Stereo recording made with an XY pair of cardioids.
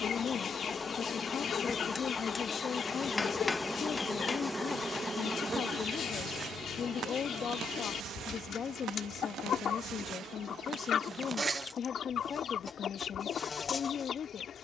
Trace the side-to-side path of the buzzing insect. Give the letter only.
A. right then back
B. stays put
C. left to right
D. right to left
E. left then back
A.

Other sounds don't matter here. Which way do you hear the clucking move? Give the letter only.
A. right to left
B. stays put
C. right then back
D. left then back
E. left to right
B.